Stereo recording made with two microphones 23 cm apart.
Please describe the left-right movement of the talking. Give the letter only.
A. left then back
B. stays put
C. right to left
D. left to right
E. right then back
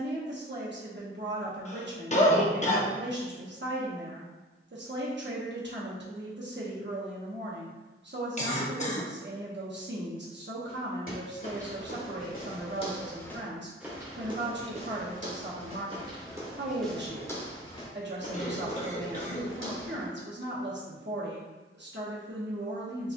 B.